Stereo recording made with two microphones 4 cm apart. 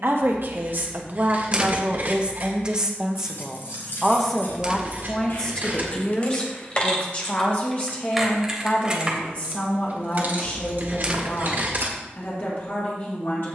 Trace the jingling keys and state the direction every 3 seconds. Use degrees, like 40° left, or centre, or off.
off, 50° left, 10° left, 40° right, off.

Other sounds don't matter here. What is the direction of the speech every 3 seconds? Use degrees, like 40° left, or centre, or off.
40° right, 10° left, 30° left, 50° left, 50° left.